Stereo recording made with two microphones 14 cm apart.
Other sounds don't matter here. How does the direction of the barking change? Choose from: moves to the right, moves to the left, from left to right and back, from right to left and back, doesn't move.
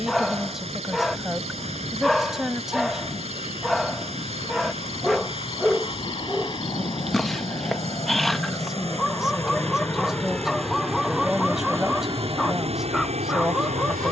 doesn't move.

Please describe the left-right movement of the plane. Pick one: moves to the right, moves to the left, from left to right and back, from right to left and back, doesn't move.
moves to the right.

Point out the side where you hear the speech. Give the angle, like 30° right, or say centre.
centre.